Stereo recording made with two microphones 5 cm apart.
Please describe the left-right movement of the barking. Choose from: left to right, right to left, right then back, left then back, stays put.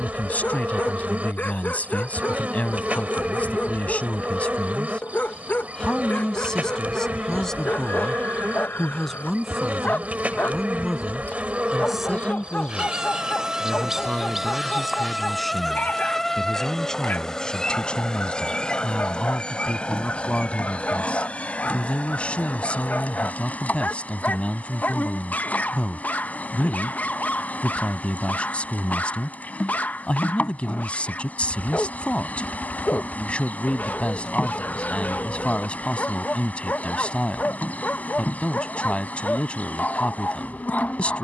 stays put.